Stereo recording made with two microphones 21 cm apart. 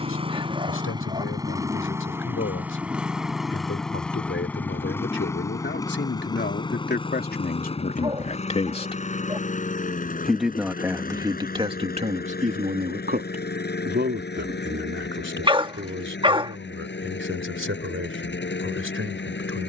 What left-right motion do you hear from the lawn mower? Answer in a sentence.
You can hear the lawn mower travel towards the left.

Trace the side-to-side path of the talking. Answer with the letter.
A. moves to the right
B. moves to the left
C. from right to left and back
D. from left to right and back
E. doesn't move
A.